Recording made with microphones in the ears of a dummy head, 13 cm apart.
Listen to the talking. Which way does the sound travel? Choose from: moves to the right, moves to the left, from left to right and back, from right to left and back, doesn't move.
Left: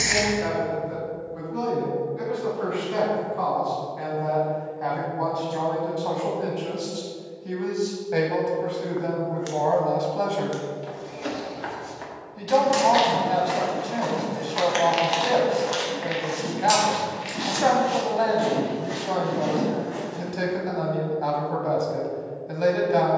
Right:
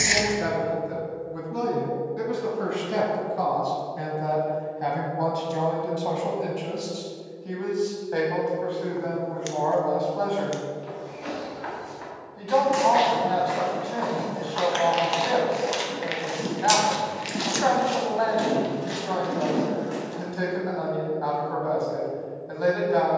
moves to the left.